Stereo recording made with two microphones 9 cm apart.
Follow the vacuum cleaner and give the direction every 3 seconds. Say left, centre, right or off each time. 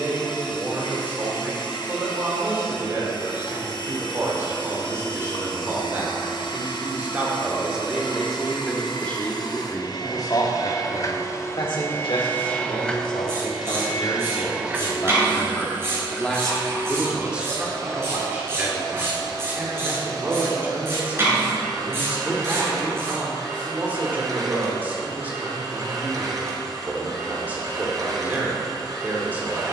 left, left, left, left, centre, right, right, right, right, right.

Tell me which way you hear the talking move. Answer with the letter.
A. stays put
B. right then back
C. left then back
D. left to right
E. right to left
C.